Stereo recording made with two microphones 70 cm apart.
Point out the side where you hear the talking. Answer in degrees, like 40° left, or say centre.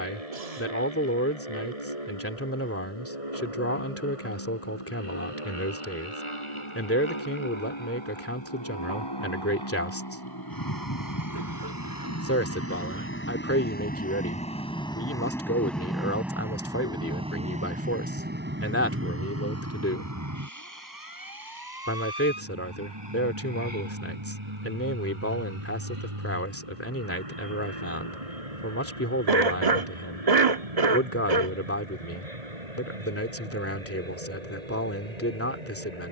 20° left.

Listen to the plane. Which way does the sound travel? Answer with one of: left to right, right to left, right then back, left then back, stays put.
left to right.